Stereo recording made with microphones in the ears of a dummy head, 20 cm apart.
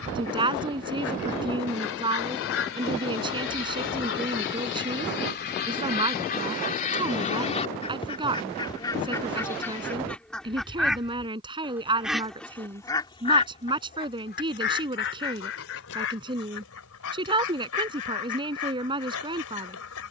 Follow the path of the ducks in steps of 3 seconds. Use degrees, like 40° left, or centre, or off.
70° left, 50° left, 30° left, centre, 30° left, 70° left, 70° left.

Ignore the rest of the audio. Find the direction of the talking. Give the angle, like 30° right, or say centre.
20° right.